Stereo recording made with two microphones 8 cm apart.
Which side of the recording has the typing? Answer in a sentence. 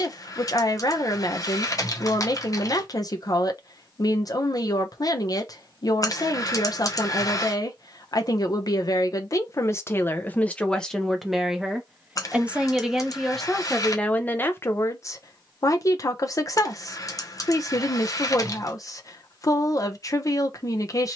You can hear the typing on the left.